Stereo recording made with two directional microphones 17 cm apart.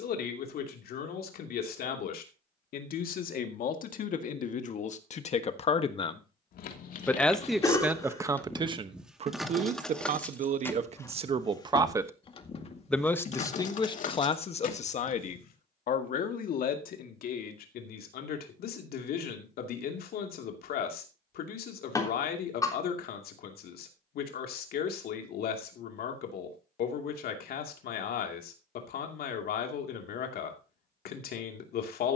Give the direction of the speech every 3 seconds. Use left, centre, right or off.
left, left, centre, right, left, left, left, left, left, left, left.